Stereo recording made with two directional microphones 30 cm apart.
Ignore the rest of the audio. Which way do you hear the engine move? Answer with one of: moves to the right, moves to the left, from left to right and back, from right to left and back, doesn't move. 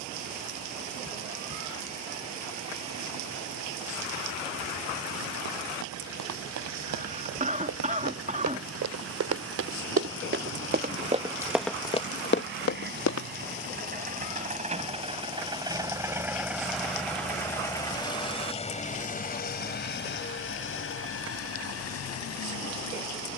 moves to the left.